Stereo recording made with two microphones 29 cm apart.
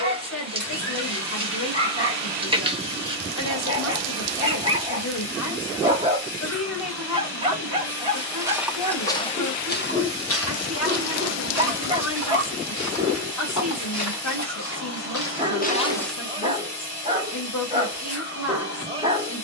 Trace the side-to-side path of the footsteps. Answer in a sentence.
In this clip you hear the footsteps move from right to left and back again.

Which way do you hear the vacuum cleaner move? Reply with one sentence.
You can hear the vacuum cleaner stay in one place.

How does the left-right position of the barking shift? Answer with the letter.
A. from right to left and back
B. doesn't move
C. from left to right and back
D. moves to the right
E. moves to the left
B.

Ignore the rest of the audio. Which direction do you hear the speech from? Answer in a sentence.
You can hear the speech on the left.